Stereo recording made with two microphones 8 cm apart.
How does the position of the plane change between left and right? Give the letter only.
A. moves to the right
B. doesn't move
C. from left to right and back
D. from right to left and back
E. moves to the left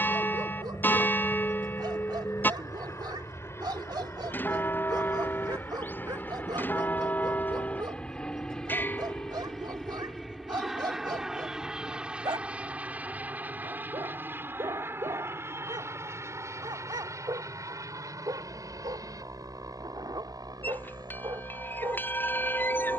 A.